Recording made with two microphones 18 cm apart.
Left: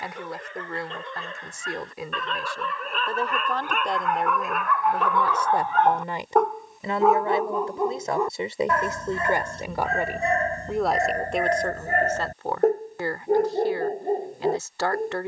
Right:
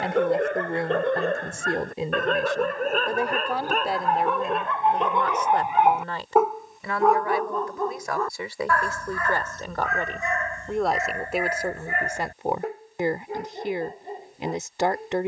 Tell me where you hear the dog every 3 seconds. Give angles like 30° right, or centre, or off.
60° right, 30° right, 10° left, 30° left, 50° left.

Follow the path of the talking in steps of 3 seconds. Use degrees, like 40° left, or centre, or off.
30° right, centre, 20° left, centre, 20° right.